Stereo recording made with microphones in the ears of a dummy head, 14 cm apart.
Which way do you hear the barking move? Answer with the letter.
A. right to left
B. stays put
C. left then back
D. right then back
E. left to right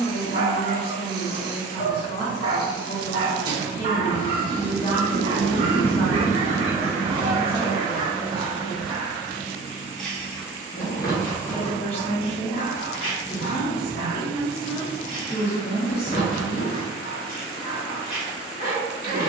A.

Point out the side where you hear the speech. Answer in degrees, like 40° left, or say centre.
40° left.